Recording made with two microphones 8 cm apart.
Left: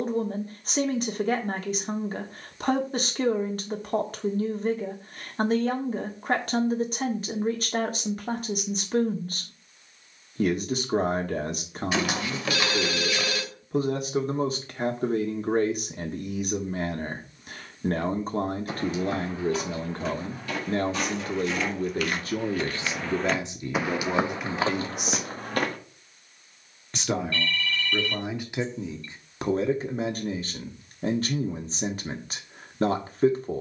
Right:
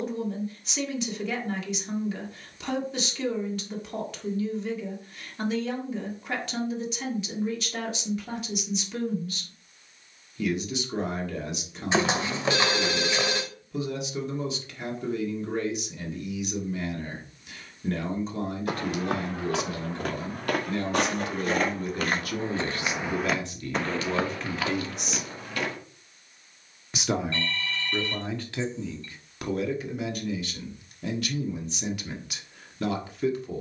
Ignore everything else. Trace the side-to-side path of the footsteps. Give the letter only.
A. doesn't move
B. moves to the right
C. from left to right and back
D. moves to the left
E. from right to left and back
D.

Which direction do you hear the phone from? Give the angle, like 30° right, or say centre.
30° right.